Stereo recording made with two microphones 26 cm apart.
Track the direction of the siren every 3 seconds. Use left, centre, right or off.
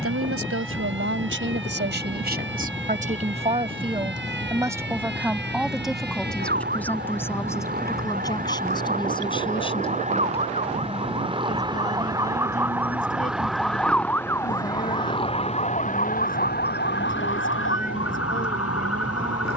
right, right, right, right, centre, left, left.